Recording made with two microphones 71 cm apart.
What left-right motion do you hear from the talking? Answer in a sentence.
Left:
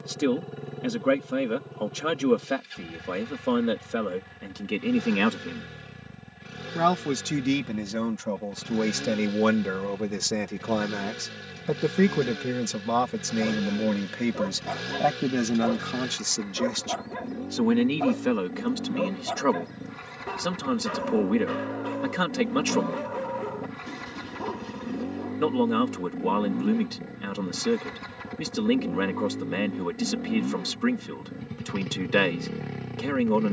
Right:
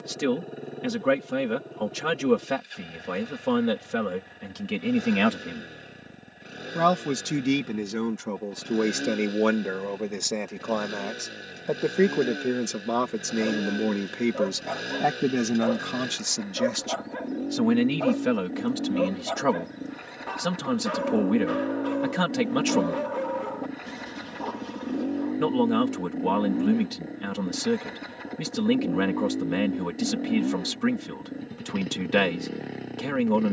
In this clip you hear the talking go left and come back.